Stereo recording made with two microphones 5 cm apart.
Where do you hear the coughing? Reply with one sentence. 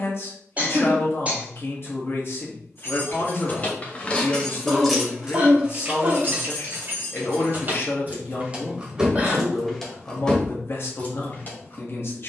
In this clip you hear the coughing on the right.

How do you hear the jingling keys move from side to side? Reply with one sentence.
You can hear the jingling keys go right and come back.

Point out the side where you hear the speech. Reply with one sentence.
In this clip you hear the speech on the left.